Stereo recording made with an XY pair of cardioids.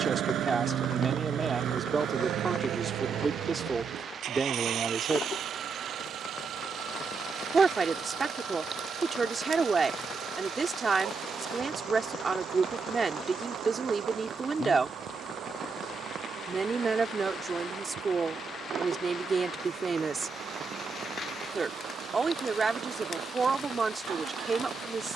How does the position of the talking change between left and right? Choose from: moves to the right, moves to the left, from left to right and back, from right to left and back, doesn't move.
doesn't move.